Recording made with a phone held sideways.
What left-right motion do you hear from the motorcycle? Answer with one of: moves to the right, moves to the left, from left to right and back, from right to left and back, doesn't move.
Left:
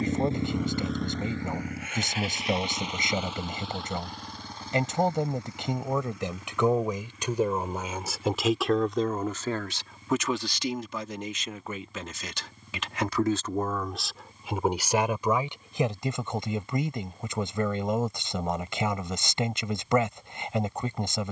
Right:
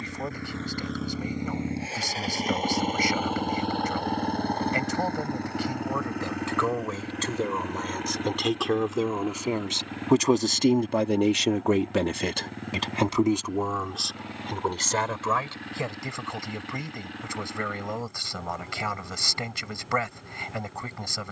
moves to the right.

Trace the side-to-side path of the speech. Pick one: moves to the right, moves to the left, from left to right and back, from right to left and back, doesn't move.
from left to right and back.